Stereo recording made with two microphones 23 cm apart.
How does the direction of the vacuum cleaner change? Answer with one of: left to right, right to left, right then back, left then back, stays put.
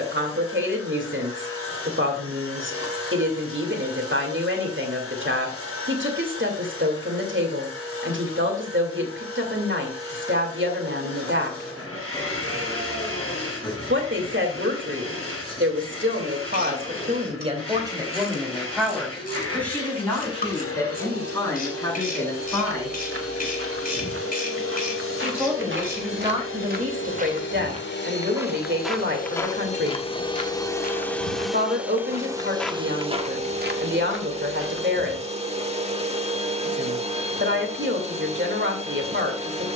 left to right.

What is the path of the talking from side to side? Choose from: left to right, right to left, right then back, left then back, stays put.
left then back.